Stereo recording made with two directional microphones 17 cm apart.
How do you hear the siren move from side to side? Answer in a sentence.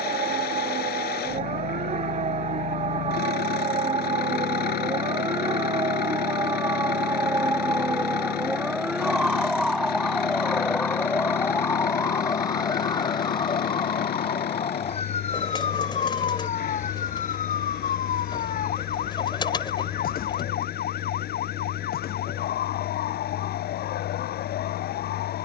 In this clip you hear the siren travel towards the left.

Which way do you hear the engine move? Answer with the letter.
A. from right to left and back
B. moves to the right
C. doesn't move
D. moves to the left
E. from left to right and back
C.